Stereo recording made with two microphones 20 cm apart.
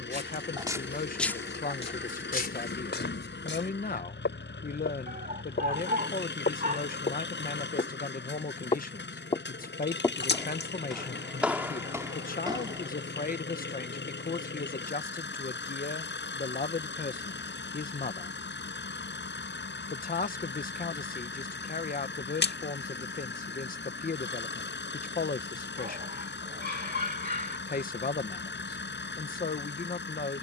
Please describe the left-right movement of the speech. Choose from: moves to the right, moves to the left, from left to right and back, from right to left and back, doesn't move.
doesn't move.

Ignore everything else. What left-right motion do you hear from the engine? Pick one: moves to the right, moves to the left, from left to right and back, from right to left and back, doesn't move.
doesn't move.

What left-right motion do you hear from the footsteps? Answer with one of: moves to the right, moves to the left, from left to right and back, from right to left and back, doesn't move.
from right to left and back.